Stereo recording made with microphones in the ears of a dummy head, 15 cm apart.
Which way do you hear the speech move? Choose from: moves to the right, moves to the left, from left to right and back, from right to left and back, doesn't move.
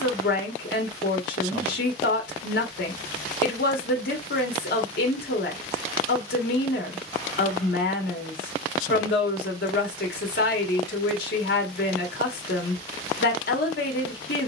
doesn't move.